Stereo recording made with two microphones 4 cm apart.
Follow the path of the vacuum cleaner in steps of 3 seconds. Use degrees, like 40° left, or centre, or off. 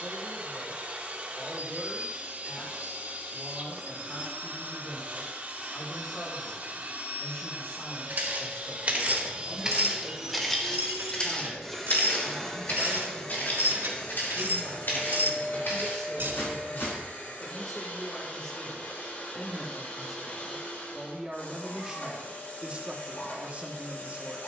40° right, 40° right, 40° right, 10° right, 20° left, 40° left, 40° left, 40° left.